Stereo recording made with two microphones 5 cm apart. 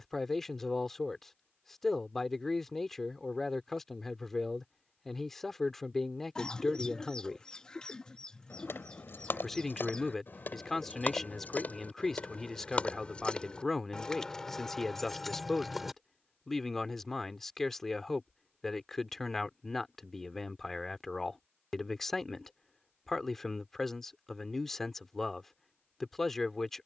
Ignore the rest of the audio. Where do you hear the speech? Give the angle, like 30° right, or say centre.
10° left.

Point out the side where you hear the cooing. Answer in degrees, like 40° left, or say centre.
20° left.